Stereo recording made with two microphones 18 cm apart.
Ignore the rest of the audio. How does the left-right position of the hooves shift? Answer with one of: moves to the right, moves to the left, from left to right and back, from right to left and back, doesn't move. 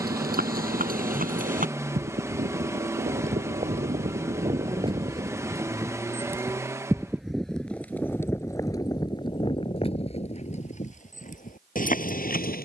moves to the left.